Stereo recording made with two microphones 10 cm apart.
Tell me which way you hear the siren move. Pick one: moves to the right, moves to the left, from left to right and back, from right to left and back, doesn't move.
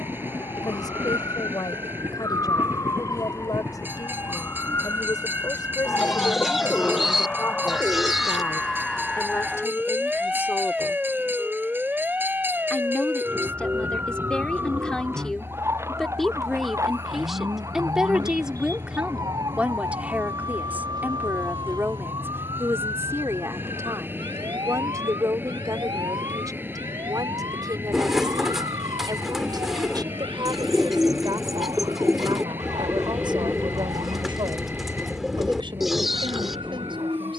moves to the right.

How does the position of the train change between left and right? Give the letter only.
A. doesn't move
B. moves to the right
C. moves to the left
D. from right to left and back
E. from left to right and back
A.